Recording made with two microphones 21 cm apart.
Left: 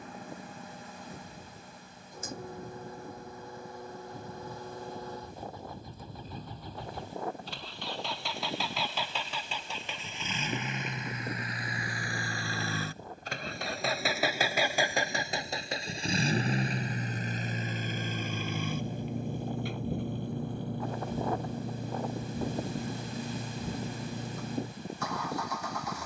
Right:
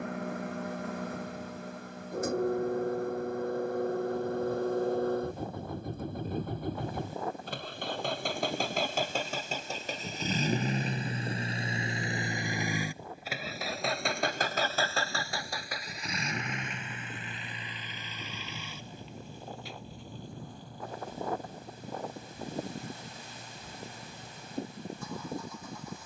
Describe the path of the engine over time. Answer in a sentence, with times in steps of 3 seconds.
In this clip you hear the engine on the right from 0 s, in the centre from 12 s and on the left from 15 s.